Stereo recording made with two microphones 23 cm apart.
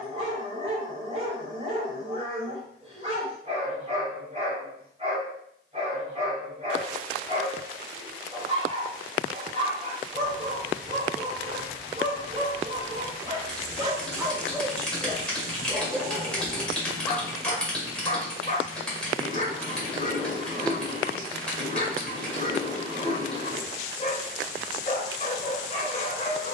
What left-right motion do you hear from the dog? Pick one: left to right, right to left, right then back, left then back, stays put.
right to left.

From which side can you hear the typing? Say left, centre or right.
centre.